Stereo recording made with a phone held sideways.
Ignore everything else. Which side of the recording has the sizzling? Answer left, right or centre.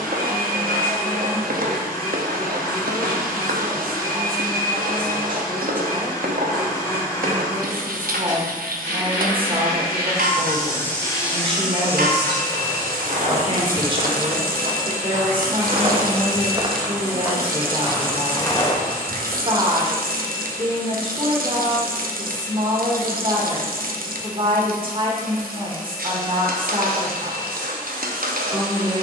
right.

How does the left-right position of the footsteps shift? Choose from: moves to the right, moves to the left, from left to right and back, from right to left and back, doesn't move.
from left to right and back.